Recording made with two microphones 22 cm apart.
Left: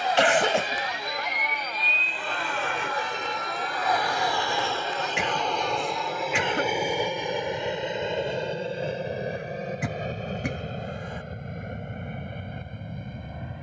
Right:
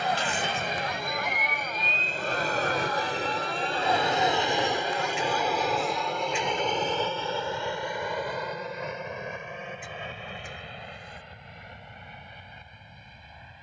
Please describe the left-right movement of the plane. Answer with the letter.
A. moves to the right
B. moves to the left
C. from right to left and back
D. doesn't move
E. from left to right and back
B.